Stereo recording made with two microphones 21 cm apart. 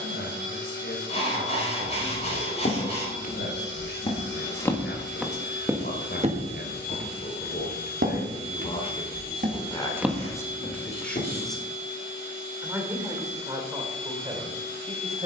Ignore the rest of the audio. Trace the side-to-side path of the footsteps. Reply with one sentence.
You can hear the footsteps go right and come back.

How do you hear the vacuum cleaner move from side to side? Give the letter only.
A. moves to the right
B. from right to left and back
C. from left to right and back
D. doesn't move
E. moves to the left
D.